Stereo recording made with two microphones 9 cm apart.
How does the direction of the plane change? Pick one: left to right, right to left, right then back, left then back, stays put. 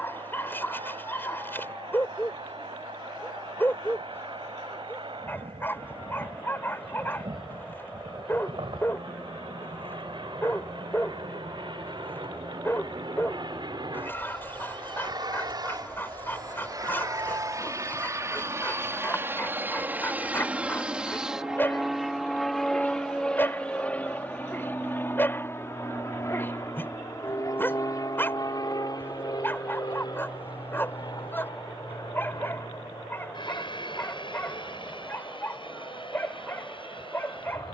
right to left.